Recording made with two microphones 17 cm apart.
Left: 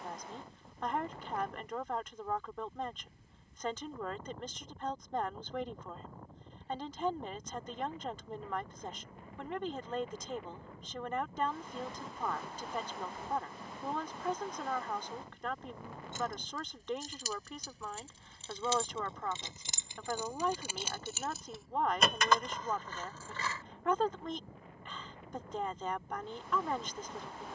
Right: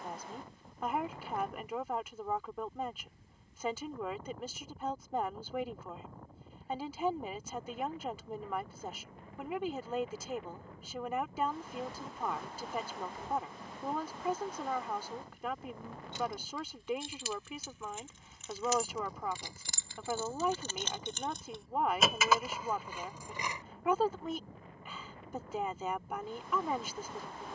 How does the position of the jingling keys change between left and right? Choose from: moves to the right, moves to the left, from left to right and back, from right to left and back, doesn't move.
moves to the right.